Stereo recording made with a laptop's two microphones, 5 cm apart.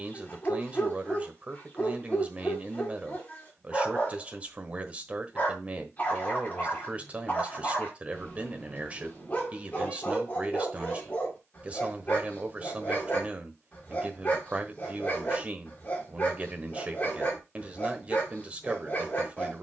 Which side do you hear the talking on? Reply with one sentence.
In this clip you hear the talking on the right.